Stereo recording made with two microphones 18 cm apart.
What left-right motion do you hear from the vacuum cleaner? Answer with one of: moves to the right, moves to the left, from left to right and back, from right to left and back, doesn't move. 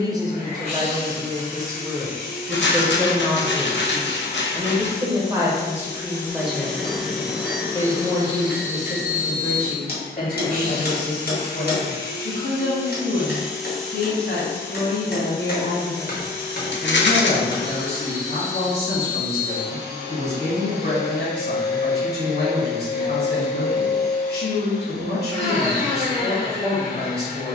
from left to right and back.